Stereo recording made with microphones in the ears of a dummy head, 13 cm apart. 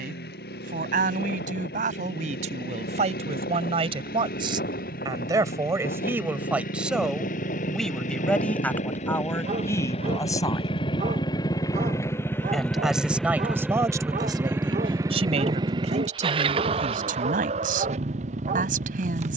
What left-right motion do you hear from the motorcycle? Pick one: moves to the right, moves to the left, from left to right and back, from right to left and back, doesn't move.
moves to the right.